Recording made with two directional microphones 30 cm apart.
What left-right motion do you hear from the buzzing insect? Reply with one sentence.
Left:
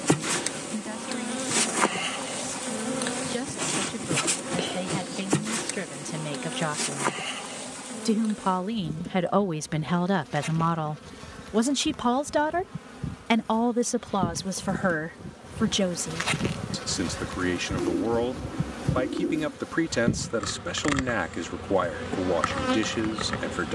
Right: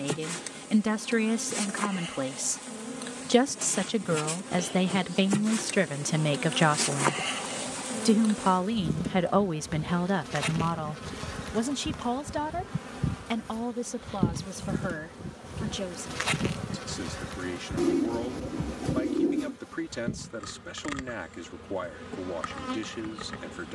You can hear the buzzing insect move from left to right and back again.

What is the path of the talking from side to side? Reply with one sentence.
In this clip you hear the talking move to the left.